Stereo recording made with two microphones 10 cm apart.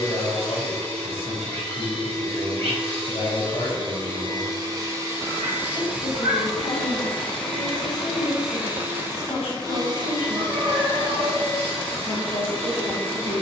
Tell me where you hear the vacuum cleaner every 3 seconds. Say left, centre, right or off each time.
right, right, centre, right, right.